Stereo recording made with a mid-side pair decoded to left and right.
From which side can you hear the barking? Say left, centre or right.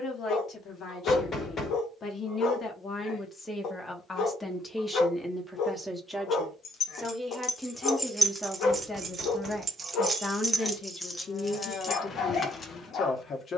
left.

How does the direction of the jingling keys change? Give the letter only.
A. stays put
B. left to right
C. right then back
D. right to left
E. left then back
C.